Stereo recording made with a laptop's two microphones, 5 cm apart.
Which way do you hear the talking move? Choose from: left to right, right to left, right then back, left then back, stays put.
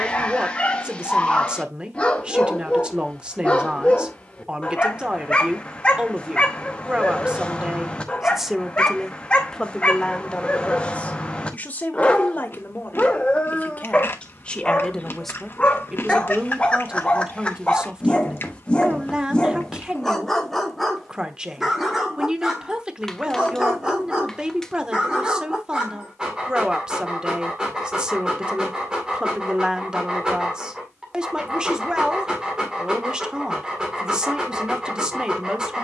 left then back.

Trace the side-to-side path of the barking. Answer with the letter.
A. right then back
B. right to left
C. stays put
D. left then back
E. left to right
E.